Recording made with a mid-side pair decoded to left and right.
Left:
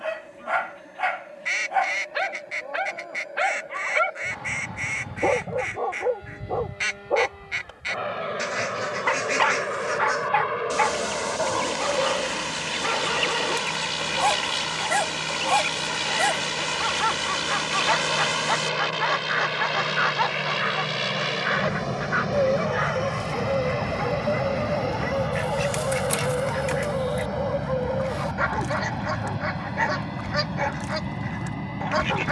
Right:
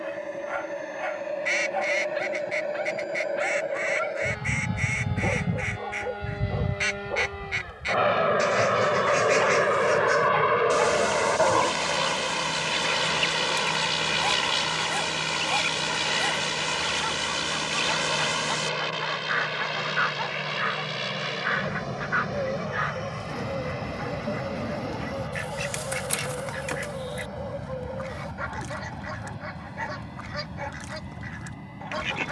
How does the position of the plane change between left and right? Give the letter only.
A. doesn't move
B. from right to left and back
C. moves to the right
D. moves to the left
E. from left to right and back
D.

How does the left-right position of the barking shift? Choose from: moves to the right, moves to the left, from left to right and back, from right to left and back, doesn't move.
doesn't move.